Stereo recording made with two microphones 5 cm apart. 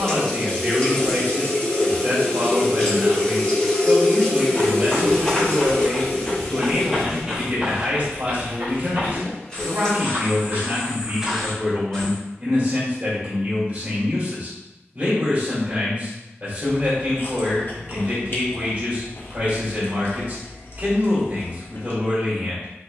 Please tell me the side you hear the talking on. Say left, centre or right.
right.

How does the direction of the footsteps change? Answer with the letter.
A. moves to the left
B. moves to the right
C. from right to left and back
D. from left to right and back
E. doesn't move
D.